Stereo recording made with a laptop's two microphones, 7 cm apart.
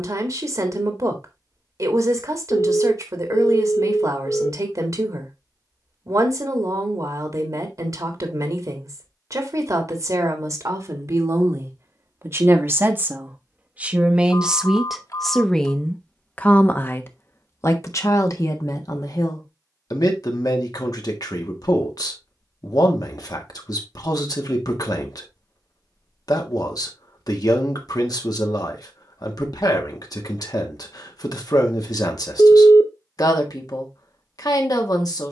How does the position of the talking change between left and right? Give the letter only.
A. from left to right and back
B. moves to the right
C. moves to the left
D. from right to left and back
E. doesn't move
C.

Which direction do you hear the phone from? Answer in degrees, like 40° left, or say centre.
50° left.